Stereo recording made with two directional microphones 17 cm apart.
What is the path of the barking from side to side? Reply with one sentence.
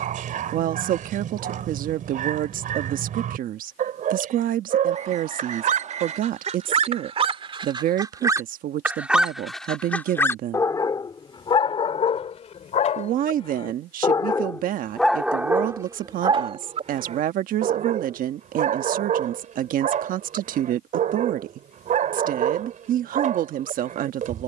In this clip you hear the barking move from right to left and back again.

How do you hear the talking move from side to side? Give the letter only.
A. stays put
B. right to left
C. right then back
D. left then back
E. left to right
A.